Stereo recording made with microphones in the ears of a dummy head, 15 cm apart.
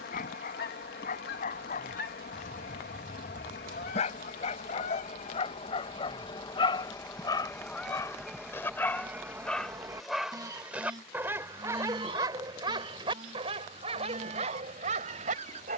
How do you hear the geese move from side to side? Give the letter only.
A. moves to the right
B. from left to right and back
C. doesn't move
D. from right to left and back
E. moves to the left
A.